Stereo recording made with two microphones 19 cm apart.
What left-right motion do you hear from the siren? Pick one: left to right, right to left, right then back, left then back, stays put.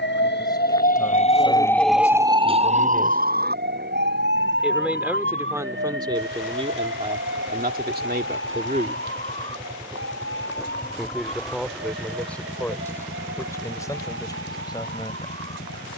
left to right.